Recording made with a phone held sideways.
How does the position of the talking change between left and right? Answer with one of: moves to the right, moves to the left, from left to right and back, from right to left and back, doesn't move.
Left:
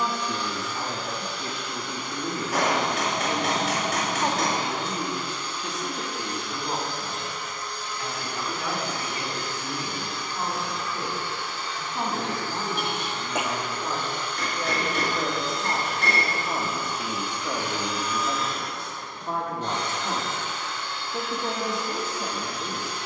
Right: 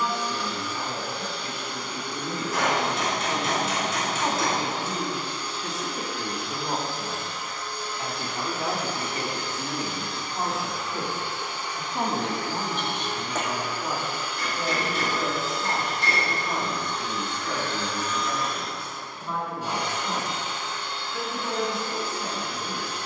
from left to right and back.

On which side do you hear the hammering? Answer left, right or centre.
left.